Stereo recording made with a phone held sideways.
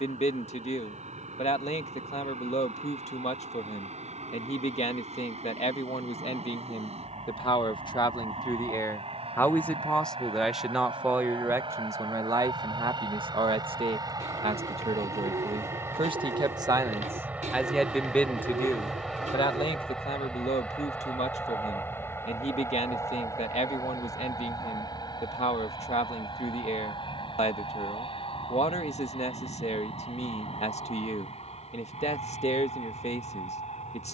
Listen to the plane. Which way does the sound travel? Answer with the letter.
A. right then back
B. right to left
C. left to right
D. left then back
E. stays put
B.